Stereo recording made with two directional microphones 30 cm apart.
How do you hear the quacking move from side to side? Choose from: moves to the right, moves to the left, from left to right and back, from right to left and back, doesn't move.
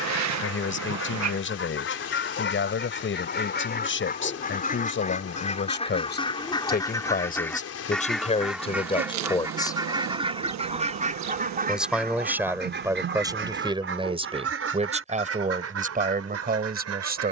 moves to the right.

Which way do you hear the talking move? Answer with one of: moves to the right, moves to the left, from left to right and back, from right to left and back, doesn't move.
moves to the right.